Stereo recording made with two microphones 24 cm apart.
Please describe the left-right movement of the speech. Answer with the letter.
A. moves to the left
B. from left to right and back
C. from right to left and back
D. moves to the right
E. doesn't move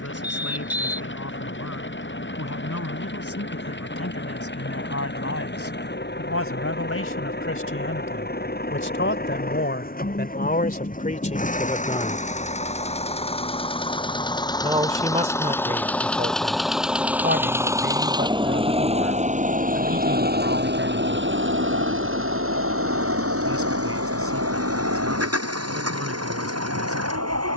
D.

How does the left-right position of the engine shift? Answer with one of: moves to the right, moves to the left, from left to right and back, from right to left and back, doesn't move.
moves to the right.